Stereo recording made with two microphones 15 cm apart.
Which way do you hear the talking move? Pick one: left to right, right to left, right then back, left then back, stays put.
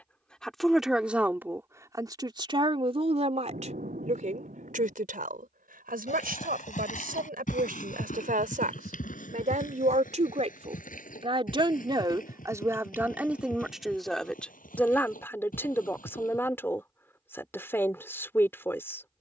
right then back.